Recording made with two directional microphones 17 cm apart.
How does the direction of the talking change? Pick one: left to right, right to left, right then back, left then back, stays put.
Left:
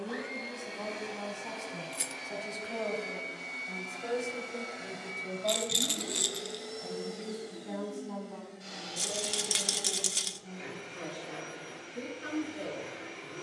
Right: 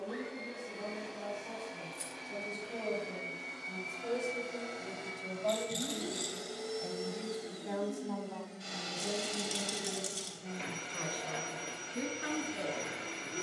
left to right.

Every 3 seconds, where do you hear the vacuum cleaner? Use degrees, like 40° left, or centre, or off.
30° left, 10° left, 10° right, 30° right, 40° right.